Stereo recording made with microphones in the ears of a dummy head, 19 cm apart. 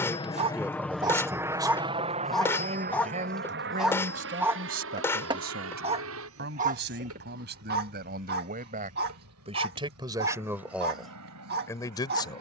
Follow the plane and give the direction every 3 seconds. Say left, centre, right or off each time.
centre, right, right, right.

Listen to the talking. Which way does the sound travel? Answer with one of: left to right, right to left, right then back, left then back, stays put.
right then back.